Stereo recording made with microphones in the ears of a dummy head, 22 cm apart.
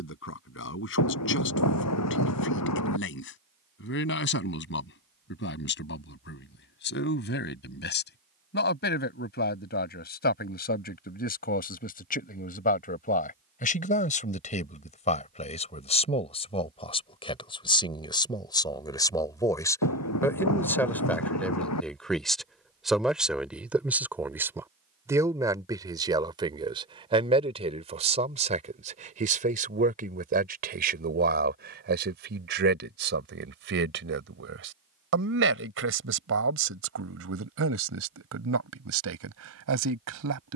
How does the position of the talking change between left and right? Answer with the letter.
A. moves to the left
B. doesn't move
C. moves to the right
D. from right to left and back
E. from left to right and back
C.